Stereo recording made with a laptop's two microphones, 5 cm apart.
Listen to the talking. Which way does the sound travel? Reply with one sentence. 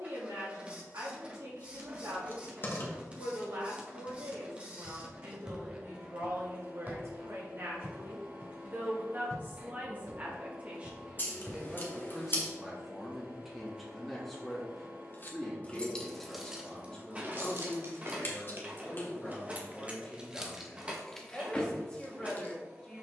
In this clip you hear the talking move from right to left.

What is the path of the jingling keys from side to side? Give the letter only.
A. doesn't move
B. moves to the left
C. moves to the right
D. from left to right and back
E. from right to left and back
D.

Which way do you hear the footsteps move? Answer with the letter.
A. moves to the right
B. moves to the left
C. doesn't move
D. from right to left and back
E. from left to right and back
E.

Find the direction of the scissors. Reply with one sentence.
In this clip you hear the scissors on the left.